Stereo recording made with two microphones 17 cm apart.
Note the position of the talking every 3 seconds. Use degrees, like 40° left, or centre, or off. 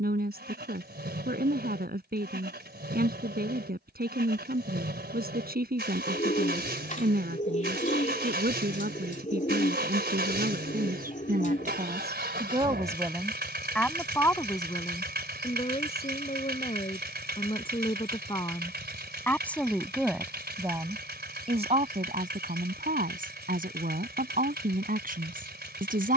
70° right, 70° right, 70° right, 60° right, centre, 40° left, 10° left, 50° right, 60° right.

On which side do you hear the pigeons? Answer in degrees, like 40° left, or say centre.
50° left.